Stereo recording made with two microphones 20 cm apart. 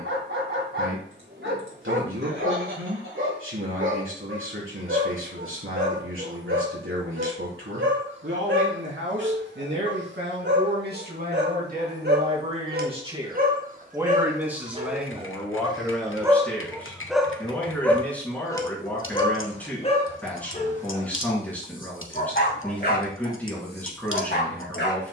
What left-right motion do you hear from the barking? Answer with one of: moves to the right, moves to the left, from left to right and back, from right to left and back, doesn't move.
moves to the left.